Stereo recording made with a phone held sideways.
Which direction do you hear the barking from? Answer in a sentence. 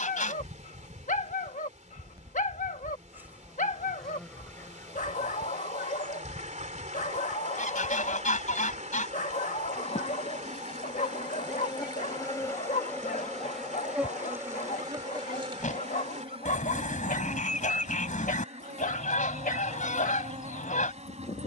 You can hear the barking on the left.